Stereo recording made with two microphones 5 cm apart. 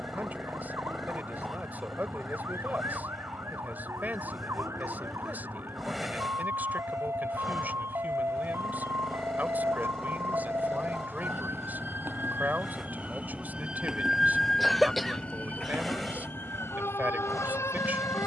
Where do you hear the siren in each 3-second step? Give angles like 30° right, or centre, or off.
70° right, 70° right, 70° right, 60° right, 20° right, 50° left.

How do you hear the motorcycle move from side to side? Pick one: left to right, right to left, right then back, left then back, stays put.
stays put.